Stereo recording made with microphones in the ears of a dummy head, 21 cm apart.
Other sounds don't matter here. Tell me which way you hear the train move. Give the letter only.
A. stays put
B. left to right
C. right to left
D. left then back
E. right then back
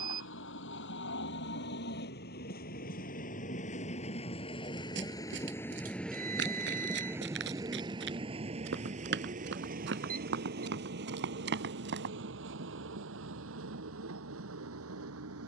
B.